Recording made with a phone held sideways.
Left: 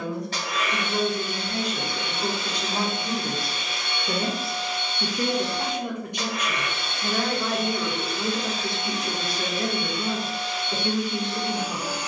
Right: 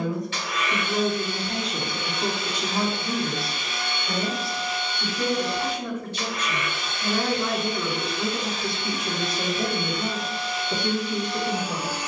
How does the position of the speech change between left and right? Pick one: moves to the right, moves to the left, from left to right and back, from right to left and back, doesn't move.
from right to left and back.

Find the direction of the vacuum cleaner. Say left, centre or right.
left.